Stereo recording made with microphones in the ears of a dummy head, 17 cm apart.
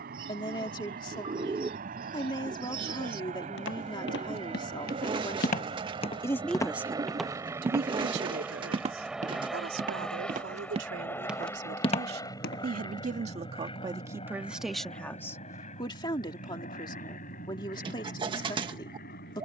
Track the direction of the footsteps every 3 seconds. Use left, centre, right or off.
off, left, centre, right, left, off, off.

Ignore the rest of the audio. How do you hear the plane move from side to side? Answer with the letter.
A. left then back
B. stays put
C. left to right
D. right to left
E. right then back
D.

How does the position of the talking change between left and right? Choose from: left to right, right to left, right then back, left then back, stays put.
right then back.